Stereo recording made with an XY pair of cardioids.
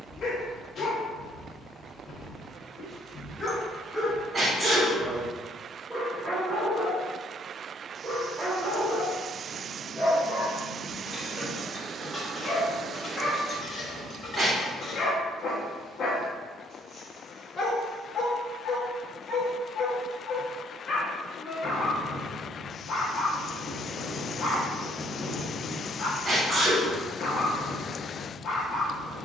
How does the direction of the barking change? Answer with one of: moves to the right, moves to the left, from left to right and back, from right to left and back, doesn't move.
from left to right and back.